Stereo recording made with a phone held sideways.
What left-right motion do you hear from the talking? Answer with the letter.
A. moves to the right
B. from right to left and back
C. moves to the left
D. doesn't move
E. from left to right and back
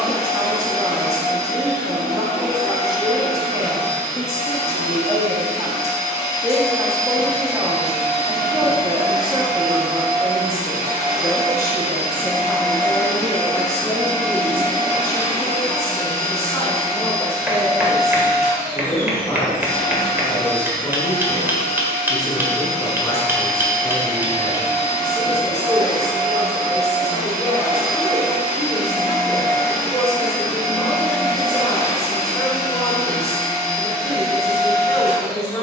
C.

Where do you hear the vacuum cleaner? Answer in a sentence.
You can hear the vacuum cleaner on the left.